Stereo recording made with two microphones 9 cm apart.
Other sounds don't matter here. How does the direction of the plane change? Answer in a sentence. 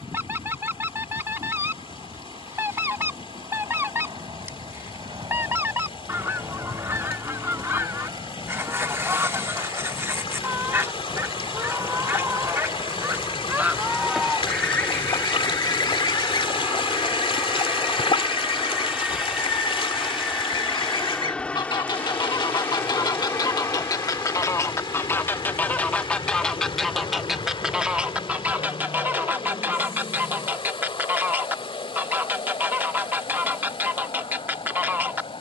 In this clip you hear the plane move to the left.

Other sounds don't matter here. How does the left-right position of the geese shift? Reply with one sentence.
In this clip you hear the geese move from right to left and back again.